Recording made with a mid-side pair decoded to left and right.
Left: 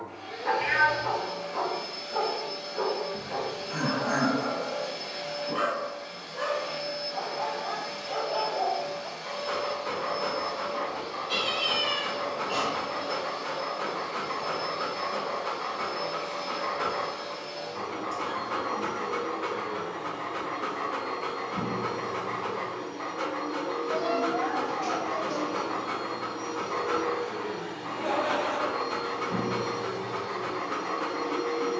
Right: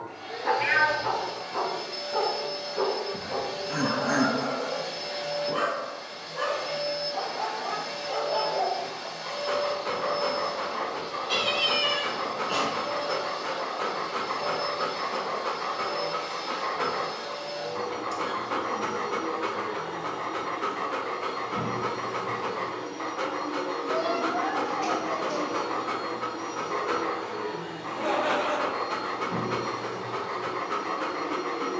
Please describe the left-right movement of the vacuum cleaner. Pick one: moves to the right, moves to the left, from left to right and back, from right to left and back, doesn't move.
moves to the left.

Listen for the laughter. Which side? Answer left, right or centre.
right.